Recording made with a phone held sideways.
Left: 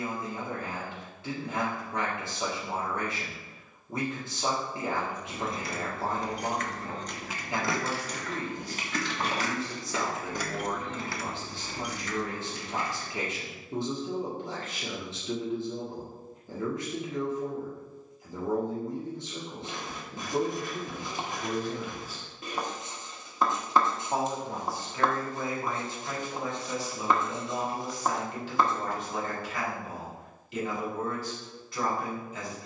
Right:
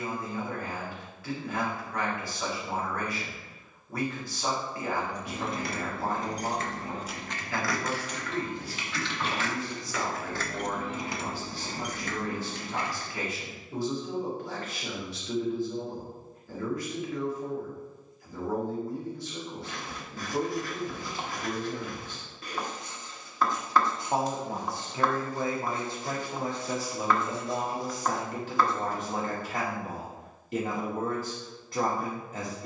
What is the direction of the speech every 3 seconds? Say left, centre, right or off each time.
left, left, left, left, left, left, left, centre, right, right, right.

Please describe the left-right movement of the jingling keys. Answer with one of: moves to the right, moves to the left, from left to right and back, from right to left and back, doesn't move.
from right to left and back.